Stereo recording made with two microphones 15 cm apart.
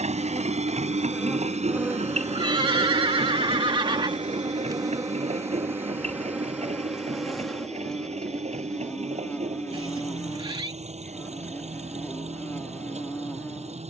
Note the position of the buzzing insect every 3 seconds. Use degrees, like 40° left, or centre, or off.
10° right, 20° right, centre, 10° left, 10° left.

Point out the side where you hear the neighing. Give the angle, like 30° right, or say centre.
30° right.